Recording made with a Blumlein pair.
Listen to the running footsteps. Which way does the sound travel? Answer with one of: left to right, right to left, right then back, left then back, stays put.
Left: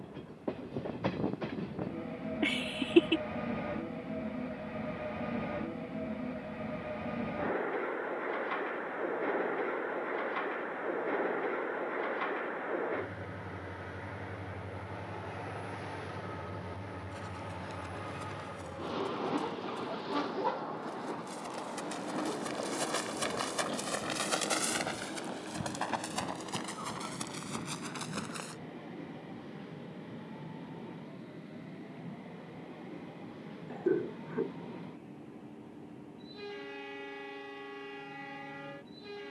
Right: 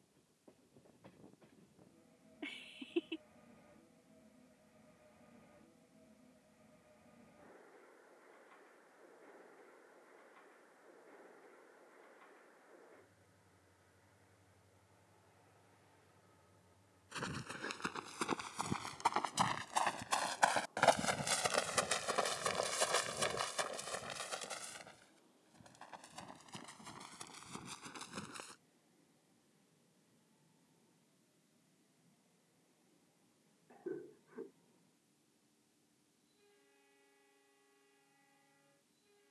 right to left.